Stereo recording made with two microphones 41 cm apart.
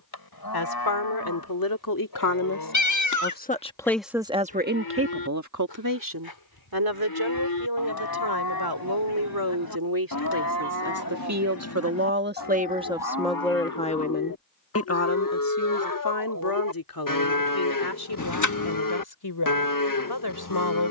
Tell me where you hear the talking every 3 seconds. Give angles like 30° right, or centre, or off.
60° left, 20° right, 70° right, 50° right, centre, 60° left, 70° left.